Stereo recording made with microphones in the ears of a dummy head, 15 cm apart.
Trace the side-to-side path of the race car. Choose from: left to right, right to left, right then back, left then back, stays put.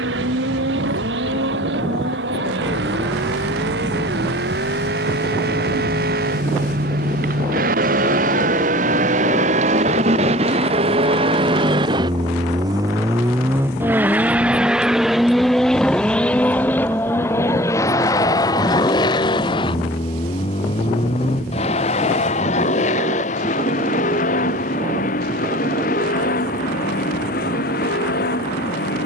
right to left.